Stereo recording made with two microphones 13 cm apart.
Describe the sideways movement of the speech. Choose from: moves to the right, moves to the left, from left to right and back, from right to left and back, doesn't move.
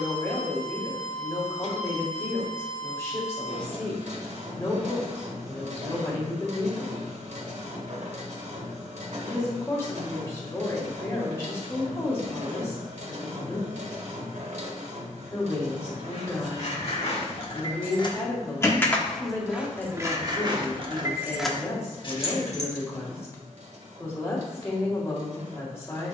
doesn't move.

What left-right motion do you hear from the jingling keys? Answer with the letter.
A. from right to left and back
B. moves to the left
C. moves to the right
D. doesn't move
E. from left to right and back
E.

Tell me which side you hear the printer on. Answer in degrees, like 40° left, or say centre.
60° right.